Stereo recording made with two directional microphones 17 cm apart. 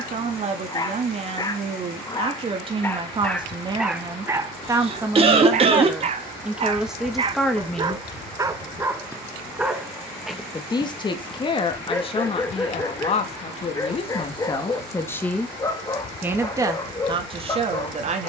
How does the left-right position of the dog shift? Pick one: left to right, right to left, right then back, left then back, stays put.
right then back.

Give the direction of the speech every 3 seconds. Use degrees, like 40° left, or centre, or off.
40° right, 20° right, centre, 30° left, 30° left, 20° right.